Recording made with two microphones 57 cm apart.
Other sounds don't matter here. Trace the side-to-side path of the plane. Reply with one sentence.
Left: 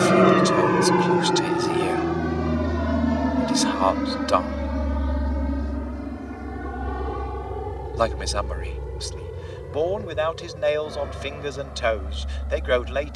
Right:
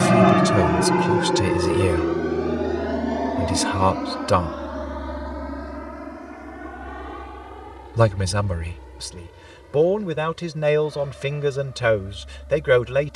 You can hear the plane travel towards the left.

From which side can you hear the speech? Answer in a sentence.
You can hear the speech on the right.